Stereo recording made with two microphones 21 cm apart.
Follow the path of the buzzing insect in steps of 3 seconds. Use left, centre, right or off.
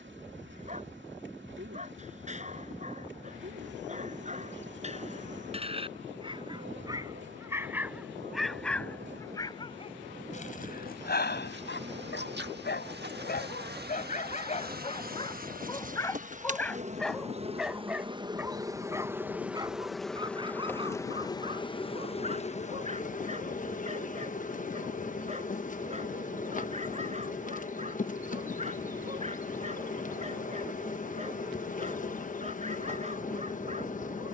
right, right, right, right, right, right, centre, left, left, left, left, left.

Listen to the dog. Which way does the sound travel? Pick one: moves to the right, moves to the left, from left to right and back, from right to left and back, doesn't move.
from right to left and back.